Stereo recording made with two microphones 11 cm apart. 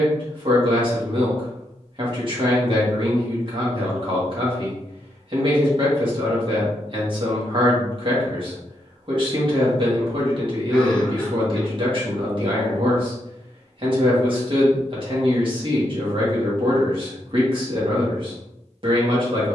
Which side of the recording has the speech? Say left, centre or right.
right.